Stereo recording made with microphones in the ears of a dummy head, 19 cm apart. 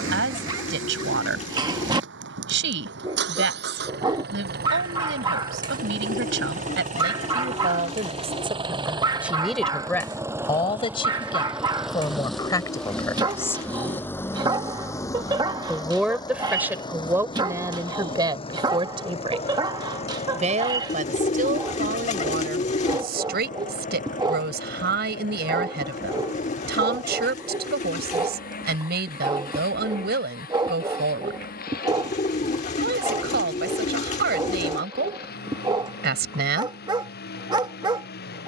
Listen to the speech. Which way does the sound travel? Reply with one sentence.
In this clip you hear the speech go left and come back.